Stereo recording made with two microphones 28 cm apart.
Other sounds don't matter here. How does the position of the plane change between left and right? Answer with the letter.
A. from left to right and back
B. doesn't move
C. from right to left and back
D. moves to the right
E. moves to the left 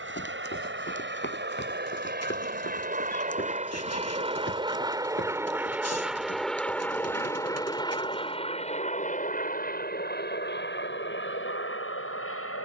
E.